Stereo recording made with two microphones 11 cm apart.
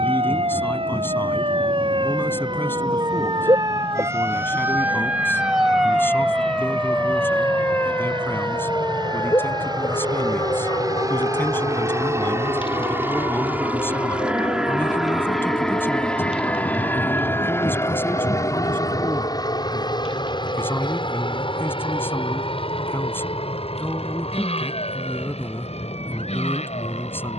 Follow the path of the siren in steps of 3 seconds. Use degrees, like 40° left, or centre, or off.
50° right, 20° right, 10° left, 40° left, 50° left, 50° left, 60° left, 60° left, 60° left.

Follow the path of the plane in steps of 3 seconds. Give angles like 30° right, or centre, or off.
60° right, 60° right, 50° right, 40° right, 20° right, 10° left, 30° left, 50° left, 60° left.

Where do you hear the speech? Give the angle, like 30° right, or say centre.
20° left.